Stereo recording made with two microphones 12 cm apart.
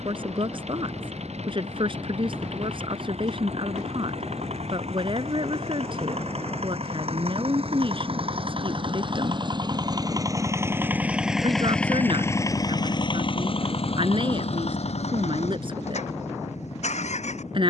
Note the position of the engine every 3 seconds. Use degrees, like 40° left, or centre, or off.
70° right, 70° right, 60° right, 20° right, 50° left, 80° left.